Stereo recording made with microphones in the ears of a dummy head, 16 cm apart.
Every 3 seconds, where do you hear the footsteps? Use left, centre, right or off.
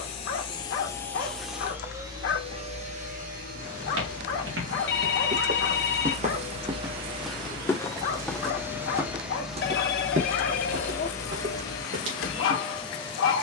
off, right, centre, right, right.